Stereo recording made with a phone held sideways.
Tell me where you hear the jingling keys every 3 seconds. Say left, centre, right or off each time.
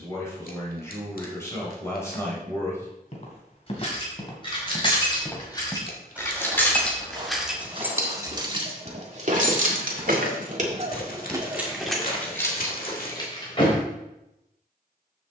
off, left, centre, right, left.